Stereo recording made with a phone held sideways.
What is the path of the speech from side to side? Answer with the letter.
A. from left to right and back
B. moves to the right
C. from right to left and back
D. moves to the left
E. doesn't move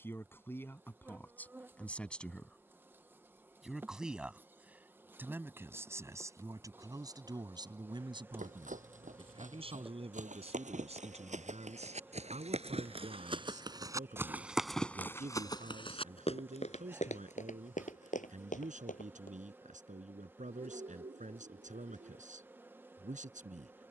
B.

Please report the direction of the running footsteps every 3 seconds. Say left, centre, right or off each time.
off, off, right, right, right, left, left, off.